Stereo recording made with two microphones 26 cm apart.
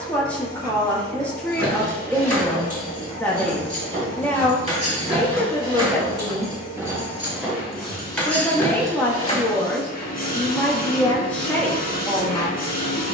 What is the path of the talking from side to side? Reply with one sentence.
You can hear the talking stay in one place.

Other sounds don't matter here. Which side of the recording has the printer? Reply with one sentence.
In this clip you hear the printer on the left.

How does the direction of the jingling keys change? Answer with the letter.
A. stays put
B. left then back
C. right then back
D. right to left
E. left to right
D.